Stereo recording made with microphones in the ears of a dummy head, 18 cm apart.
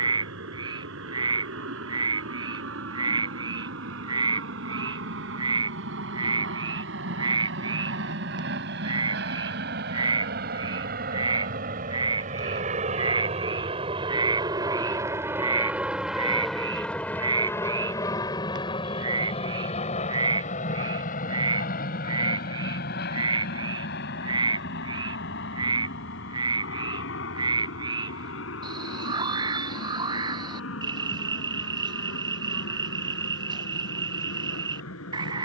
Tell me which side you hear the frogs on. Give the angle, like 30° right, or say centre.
20° right.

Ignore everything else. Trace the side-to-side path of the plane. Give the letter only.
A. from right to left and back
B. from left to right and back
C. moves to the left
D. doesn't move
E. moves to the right
C.